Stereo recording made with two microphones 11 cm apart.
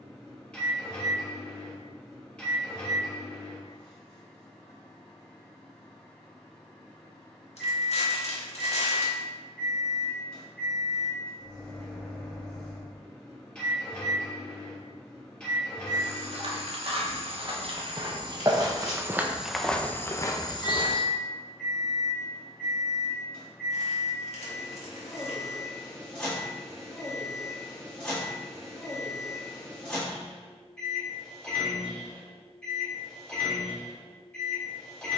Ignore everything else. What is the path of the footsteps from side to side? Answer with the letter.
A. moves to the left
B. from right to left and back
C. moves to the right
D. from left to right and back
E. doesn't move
A.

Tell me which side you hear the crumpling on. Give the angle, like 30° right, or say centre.
70° left.